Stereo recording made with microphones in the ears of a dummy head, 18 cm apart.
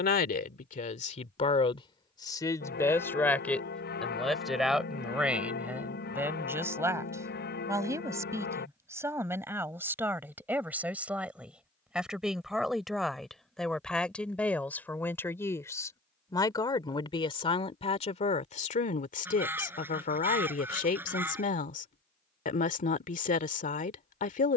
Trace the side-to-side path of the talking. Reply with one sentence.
In this clip you hear the talking move from left to right and back again.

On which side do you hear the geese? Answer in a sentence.
You can hear the geese in the centre.